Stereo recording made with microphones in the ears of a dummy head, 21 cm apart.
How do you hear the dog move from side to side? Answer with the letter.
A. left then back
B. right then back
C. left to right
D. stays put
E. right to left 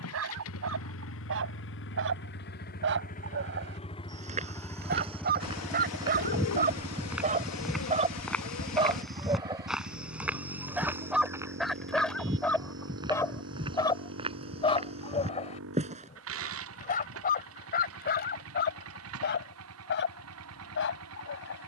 E.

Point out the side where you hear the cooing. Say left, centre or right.
left.